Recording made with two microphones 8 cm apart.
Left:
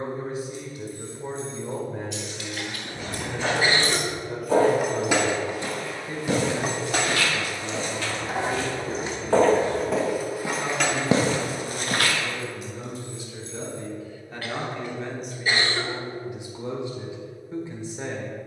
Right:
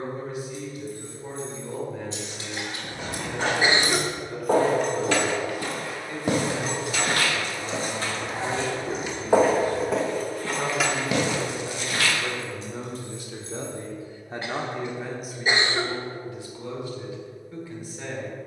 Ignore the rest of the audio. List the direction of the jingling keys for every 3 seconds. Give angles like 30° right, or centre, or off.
40° right, centre, 40° left, 10° left, 40° right, off.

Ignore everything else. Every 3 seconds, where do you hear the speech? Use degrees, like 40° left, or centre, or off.
30° left, 30° left, centre, 60° right, 50° right, 20° left.